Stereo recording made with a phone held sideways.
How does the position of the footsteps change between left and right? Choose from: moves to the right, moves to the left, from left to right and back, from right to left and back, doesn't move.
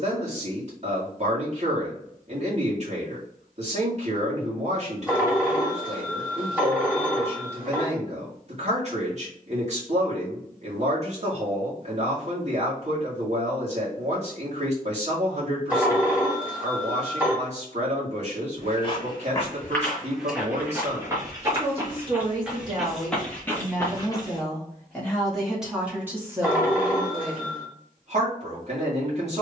from left to right and back.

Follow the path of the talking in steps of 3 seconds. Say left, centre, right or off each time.
right, right, right, right, right, right, right, right, centre, right.